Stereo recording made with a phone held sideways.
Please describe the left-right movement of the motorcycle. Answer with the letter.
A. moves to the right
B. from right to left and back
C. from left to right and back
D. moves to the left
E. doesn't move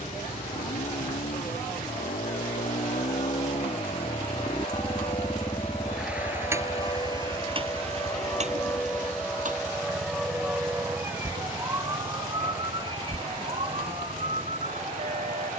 A.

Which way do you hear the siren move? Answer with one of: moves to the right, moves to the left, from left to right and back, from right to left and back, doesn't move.
moves to the right.